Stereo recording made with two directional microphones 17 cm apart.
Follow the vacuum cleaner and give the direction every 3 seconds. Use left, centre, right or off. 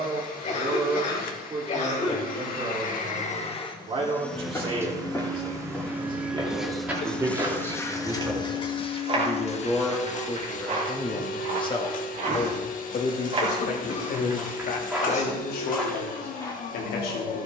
left, centre, centre, left, left, left.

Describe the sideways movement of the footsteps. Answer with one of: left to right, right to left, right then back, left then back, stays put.
right then back.